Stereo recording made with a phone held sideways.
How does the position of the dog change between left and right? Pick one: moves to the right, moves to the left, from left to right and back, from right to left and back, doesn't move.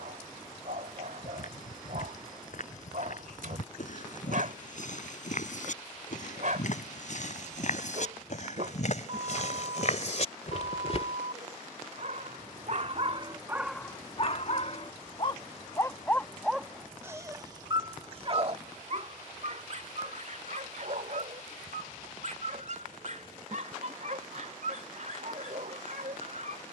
from right to left and back.